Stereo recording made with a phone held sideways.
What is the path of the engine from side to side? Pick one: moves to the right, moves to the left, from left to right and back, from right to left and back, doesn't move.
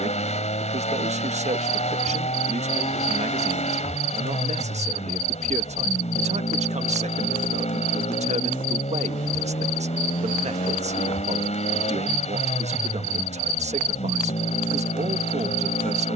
doesn't move.